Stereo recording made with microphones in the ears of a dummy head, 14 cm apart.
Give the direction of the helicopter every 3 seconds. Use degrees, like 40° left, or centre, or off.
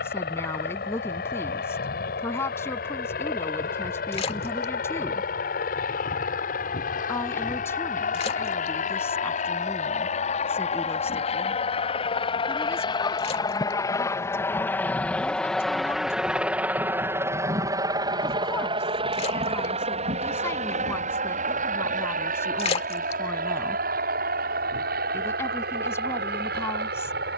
70° left, 70° left, 60° left, 50° left, 30° left, 10° right, 40° right, 50° right, 60° right.